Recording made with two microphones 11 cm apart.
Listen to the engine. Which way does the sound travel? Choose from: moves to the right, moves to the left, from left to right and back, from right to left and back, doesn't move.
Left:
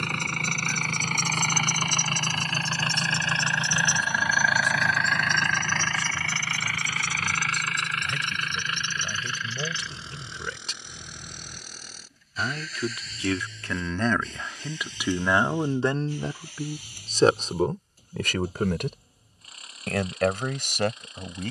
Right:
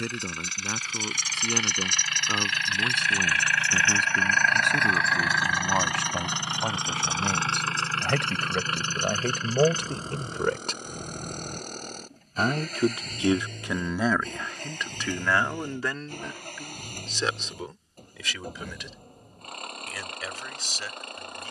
moves to the right.